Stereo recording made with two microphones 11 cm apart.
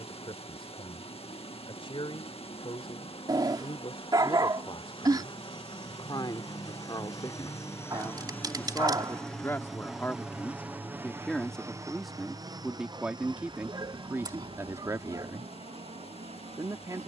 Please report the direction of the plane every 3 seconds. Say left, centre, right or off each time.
left, left, left, centre, right, right.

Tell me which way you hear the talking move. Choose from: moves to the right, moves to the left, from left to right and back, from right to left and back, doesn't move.
moves to the right.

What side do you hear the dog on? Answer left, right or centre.
right.